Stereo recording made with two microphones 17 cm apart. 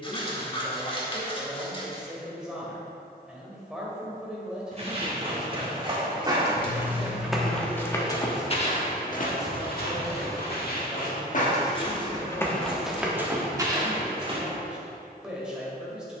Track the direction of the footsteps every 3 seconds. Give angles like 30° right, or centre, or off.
off, 30° right, 10° left, 60° left, 10° right, off.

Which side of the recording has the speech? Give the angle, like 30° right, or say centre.
centre.